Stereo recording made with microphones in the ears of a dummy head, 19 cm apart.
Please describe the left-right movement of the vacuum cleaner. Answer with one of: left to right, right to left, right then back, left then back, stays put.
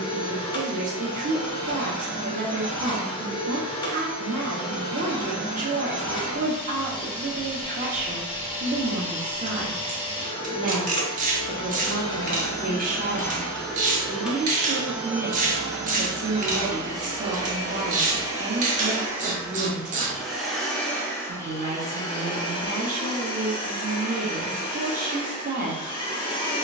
right then back.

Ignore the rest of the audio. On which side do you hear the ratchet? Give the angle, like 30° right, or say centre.
40° right.